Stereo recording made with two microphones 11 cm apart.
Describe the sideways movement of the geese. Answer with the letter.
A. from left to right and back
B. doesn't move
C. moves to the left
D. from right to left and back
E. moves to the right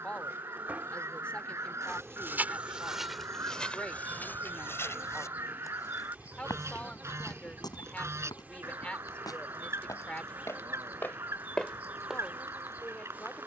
B.